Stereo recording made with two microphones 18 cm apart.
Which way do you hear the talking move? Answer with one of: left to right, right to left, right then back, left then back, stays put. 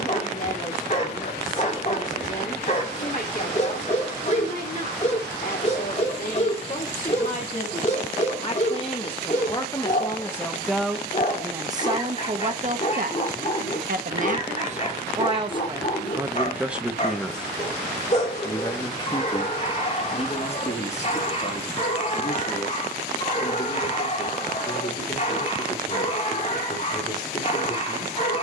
right then back.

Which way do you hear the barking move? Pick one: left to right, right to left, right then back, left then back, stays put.
stays put.